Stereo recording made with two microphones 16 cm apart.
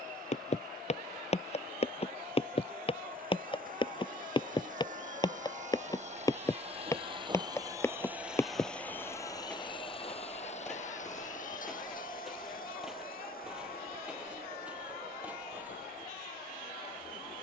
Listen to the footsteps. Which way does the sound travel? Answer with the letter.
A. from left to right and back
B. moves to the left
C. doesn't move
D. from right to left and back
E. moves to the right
E.